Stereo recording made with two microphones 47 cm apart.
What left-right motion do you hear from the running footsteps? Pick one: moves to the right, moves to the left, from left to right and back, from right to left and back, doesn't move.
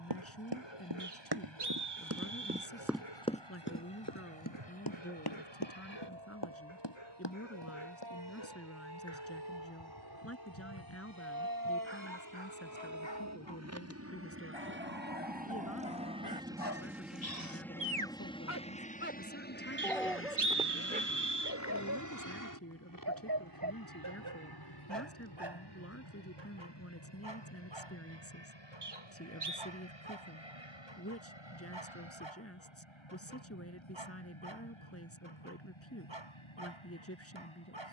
moves to the left.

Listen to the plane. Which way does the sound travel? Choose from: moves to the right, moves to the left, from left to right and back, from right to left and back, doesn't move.
moves to the left.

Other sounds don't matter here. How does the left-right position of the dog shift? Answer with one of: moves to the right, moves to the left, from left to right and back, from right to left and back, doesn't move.
moves to the right.